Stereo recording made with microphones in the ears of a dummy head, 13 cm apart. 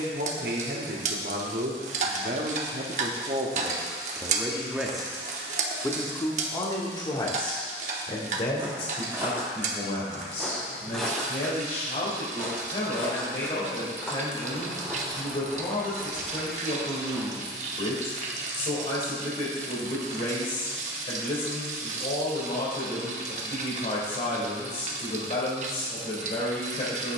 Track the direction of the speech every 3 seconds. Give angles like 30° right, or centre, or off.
60° right, 20° right, 30° left, 40° left, 50° left, 50° left, 50° left, 50° left, 50° left.